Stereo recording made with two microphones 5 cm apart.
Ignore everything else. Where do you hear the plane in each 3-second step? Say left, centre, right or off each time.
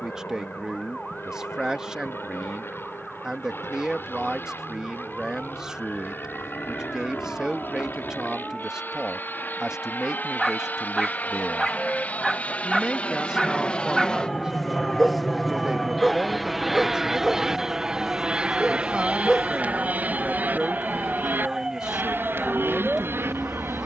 left, left, left, left, left, centre, right, right.